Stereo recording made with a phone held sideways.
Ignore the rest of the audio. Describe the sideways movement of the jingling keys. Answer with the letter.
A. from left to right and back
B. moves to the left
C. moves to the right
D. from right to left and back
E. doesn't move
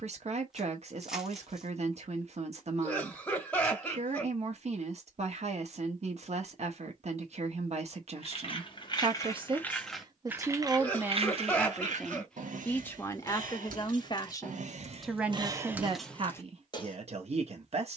A.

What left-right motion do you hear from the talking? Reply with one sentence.
You can hear the talking go left and come back.